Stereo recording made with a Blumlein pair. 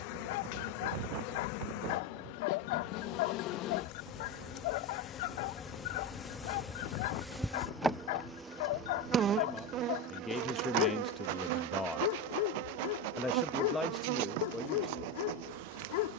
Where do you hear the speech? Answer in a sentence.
In this clip you hear the speech in the centre.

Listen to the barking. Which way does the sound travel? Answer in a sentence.
In this clip you hear the barking stay in one place.